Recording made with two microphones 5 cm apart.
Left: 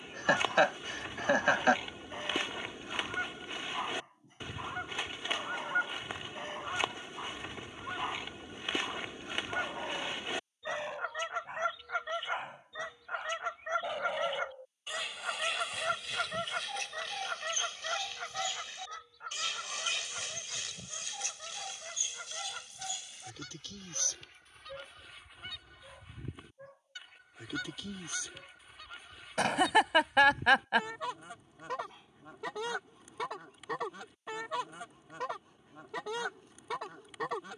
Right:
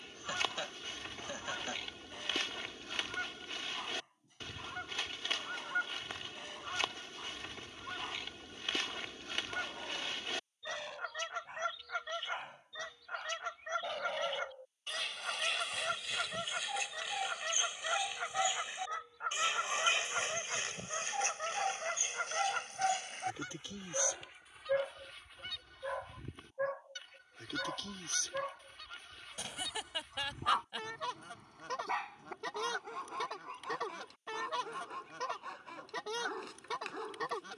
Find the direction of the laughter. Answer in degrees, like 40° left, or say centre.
70° left.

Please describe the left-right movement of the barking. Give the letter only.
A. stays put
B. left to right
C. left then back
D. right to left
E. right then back
B.